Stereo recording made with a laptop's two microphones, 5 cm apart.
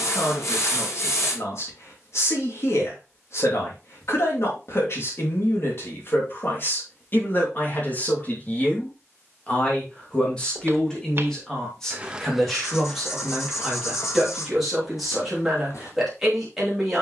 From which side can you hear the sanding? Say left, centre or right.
left.